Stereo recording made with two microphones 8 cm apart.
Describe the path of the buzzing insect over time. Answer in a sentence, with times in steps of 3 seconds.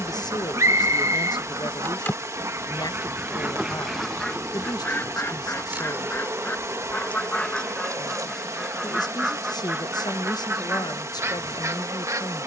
You can hear the buzzing insect on the left from 0 s, in the centre from 3 s and on the right from 6 s.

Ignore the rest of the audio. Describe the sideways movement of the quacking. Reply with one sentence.
You can hear the quacking move from right to left and back again.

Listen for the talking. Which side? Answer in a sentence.
You can hear the talking on the left.